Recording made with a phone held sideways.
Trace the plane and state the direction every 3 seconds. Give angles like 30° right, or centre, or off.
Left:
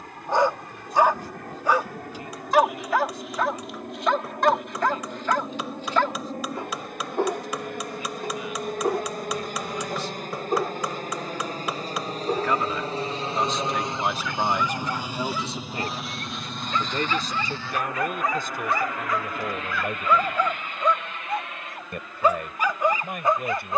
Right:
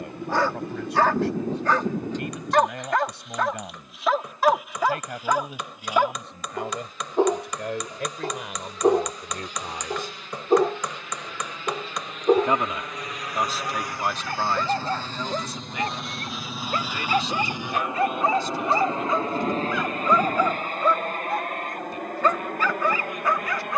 70° left, 70° left, 60° left, 50° left, 30° left, centre, 30° right, 50° right.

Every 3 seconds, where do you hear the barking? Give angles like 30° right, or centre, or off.
10° left, centre, 20° right, 30° right, 40° right, 40° right, 20° right, 10° left.